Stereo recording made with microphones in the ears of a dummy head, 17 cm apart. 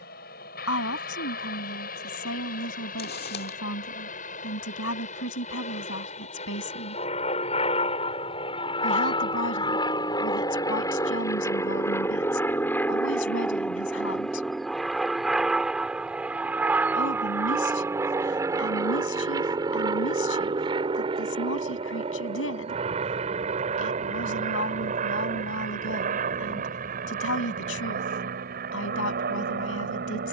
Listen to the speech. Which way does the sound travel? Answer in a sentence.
In this clip you hear the speech stay put.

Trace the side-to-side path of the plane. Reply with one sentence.
You can hear the plane travel towards the right.